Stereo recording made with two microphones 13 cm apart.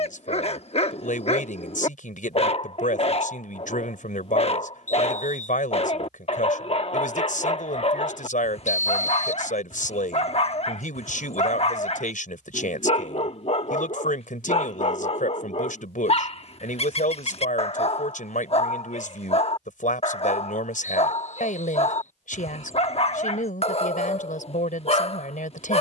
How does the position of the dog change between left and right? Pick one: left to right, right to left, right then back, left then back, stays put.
stays put.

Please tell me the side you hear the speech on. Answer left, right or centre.
left.